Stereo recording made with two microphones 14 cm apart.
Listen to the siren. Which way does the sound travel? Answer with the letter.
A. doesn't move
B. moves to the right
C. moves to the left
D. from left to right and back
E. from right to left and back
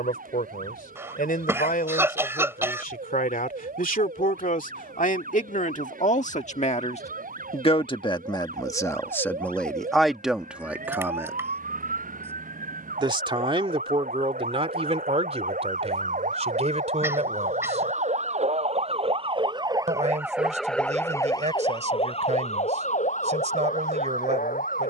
C.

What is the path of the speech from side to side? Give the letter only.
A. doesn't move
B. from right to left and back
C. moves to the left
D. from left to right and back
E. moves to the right
E.